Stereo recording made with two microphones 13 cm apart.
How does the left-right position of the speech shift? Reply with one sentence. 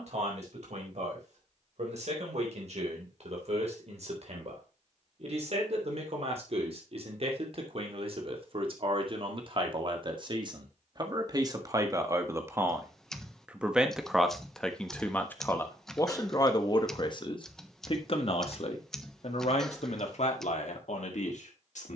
In this clip you hear the speech move to the left.